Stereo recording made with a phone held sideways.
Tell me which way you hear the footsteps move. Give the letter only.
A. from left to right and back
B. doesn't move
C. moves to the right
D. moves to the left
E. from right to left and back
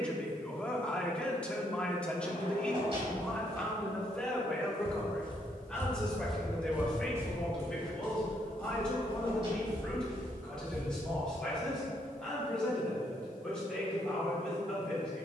C.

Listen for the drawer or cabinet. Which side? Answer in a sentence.
You can hear the drawer or cabinet on the right.